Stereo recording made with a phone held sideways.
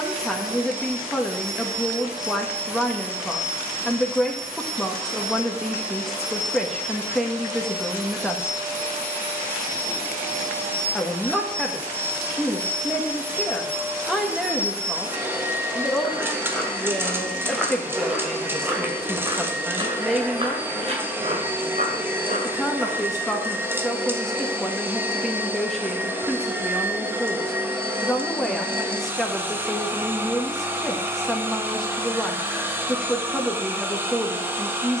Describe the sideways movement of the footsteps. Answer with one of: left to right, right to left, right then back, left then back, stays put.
left to right.